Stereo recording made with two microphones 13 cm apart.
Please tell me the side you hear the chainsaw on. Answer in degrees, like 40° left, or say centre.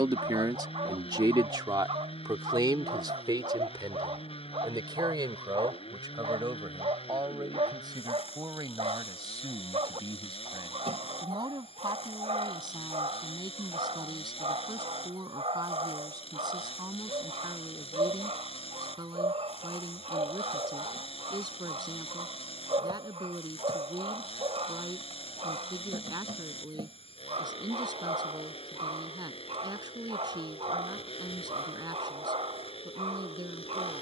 50° left.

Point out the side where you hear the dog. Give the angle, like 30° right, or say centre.
50° right.